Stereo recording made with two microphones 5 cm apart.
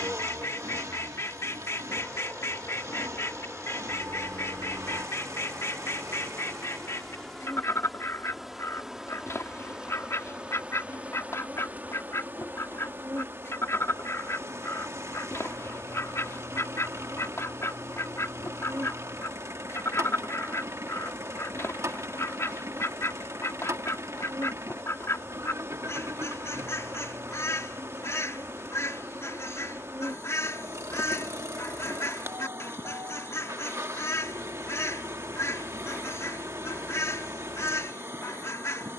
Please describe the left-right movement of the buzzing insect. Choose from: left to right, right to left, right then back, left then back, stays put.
left to right.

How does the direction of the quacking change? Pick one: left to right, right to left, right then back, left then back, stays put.
stays put.